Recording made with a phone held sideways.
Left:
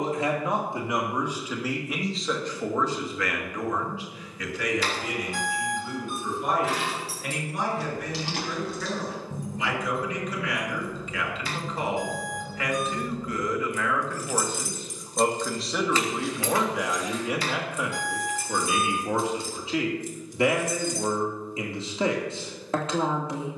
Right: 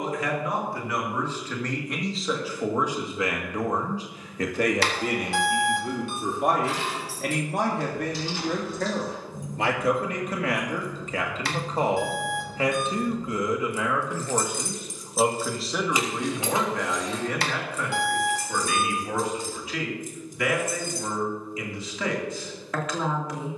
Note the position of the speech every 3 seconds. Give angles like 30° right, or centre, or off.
10° left, 40° right, 60° right, 40° right, 20° right, 10° left, 20° left, 30° left.